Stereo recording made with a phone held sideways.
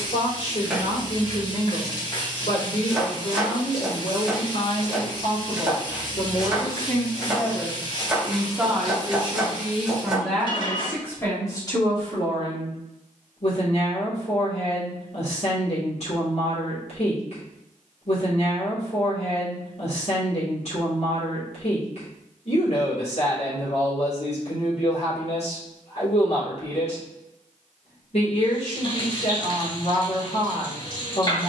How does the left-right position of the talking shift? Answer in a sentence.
In this clip you hear the talking move from left to right and back again.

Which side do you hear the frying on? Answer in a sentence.
In this clip you hear the frying on the left.